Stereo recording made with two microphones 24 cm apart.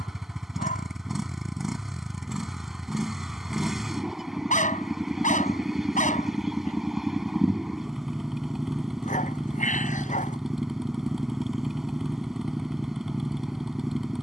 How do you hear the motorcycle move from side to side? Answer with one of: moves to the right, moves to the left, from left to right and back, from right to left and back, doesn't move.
doesn't move.